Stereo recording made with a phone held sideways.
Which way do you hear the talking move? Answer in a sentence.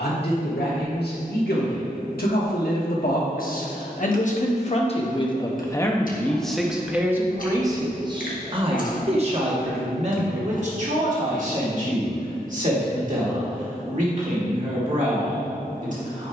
In this clip you hear the talking go from the left side to the right.